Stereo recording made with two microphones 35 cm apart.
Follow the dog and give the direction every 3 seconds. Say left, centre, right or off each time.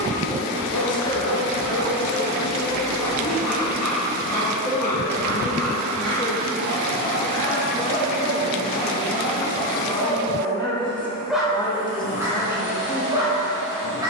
left, left, left, centre, centre.